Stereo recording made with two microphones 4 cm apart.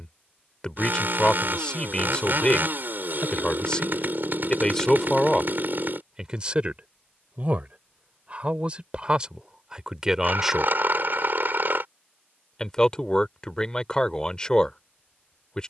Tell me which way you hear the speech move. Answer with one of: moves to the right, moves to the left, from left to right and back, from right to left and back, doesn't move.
from left to right and back.